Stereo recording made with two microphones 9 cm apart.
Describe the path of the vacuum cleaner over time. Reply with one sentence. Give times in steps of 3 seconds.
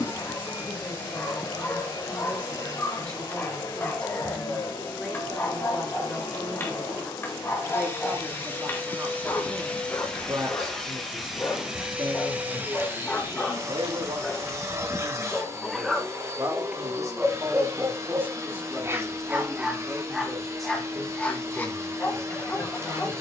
You can hear the vacuum cleaner on the left from 0 s, in the centre from 9 s and on the right from 12 s.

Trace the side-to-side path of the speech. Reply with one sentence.
You can hear the speech move from left to right and back again.